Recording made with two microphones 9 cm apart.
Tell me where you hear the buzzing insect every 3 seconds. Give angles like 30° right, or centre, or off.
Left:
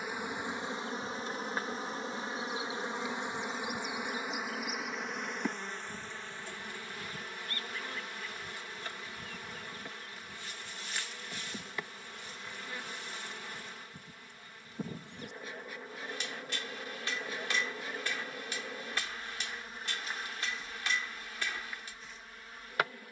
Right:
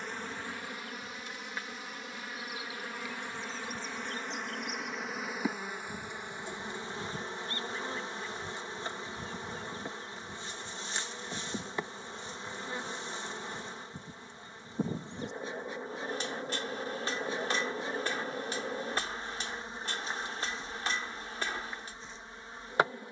30° left, 10° left, 20° right, 30° right, 30° right, 30° right, 30° right, 30° right.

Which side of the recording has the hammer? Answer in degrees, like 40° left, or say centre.
30° right.